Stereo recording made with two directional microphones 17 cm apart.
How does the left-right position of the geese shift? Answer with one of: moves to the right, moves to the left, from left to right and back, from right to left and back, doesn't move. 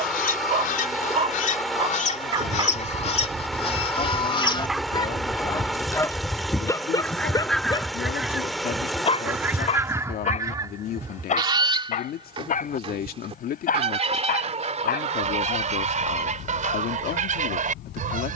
moves to the right.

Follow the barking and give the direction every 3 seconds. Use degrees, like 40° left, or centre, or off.
30° right, centre, 20° left, 40° left, 50° left, 60° left.